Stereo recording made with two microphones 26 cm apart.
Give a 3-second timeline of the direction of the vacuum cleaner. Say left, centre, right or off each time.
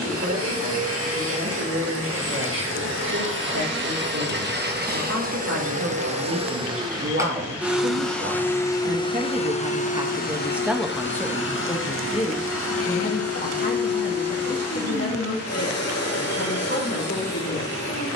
right, right, centre, left, left, left.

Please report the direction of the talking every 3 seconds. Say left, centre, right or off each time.
right, right, right, centre, left, left.